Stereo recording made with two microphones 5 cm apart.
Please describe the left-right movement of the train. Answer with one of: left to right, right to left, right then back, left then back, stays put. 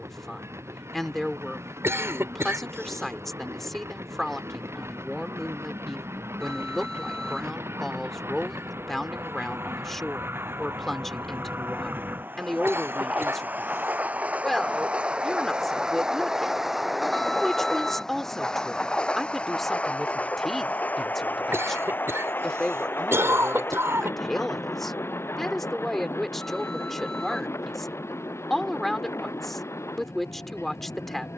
right to left.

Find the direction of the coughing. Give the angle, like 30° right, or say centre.
60° right.